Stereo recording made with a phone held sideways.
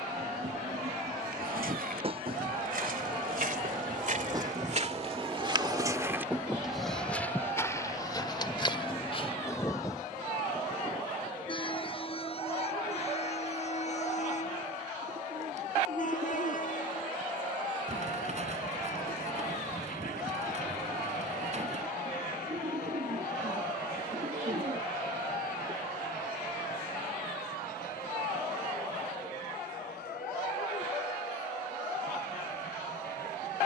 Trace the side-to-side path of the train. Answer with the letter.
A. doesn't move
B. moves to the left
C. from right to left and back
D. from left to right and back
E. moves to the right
B.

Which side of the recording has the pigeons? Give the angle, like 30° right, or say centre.
50° right.